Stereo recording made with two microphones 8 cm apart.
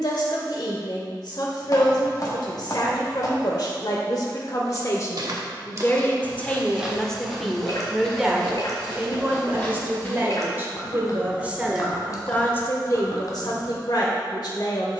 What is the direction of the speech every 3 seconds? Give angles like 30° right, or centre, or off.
60° left, 50° left, centre, 20° right, 50° left.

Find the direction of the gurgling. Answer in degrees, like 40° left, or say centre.
50° left.